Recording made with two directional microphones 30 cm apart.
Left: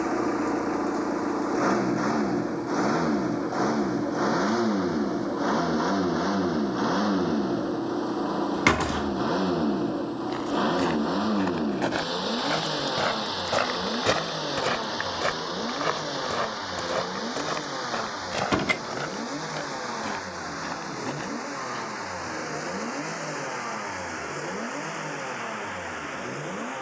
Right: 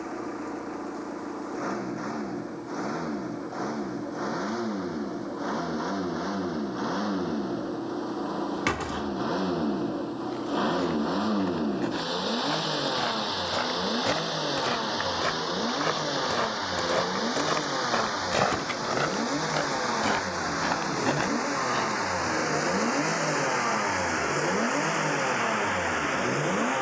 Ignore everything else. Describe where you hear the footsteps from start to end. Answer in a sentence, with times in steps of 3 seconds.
In this clip you hear the footsteps not at all from 0 s, on the left from 9 s, in the centre from 15 s, on the right from 18 s and not at all from 24 s.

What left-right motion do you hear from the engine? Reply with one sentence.
In this clip you hear the engine go from the left side to the right.